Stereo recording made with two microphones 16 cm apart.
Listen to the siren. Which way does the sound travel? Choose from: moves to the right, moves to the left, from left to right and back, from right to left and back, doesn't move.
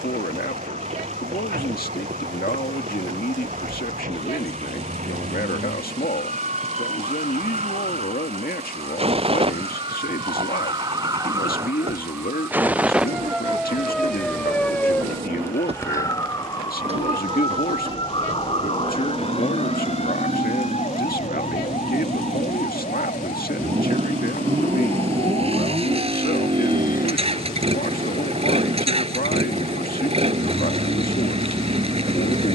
moves to the left.